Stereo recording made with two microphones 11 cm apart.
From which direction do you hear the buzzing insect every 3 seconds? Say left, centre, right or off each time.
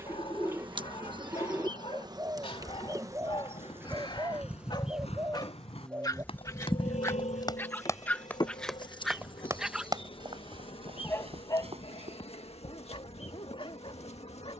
right, centre, left, left, left.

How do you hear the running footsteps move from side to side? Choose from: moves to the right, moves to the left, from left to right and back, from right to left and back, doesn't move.
moves to the right.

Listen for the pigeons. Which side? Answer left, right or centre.
right.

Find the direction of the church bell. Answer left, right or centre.
left.